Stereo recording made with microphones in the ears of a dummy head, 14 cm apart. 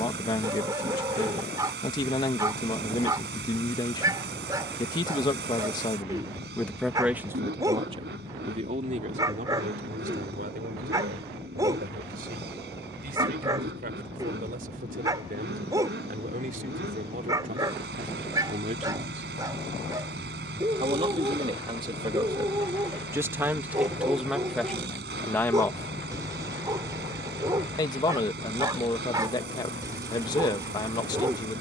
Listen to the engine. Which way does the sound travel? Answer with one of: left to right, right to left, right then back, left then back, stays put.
stays put.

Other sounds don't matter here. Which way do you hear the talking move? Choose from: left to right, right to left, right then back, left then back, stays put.
right then back.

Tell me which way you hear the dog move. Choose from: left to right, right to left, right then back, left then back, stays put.
stays put.